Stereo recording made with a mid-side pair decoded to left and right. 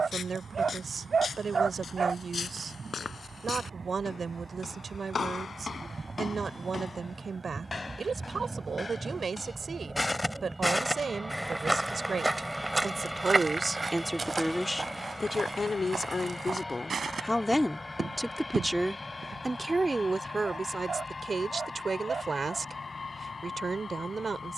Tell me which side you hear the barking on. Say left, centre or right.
right.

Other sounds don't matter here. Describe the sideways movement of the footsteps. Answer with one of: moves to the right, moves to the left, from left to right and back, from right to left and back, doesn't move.
moves to the right.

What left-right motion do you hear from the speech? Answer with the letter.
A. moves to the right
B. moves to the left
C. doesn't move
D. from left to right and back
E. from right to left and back
E.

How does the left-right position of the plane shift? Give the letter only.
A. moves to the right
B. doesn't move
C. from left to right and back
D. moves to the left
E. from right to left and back
D.